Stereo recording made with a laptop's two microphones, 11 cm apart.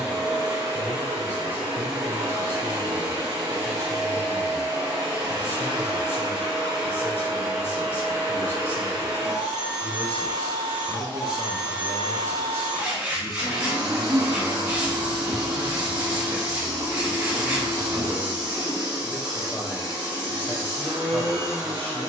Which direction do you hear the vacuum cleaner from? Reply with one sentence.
You can hear the vacuum cleaner on the right.